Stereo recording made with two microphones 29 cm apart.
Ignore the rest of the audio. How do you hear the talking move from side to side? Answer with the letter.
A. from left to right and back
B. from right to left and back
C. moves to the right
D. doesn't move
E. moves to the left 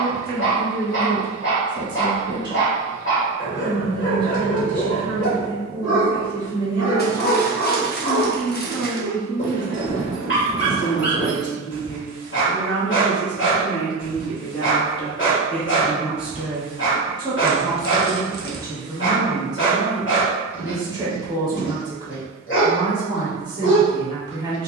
B.